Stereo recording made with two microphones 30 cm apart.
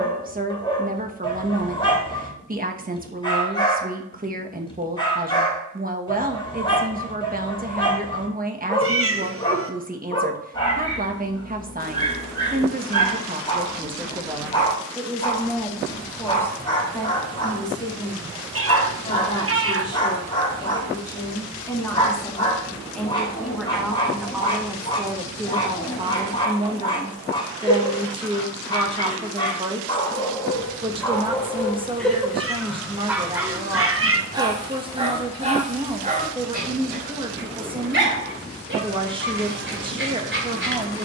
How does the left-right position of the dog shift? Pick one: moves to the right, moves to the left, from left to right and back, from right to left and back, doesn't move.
moves to the right.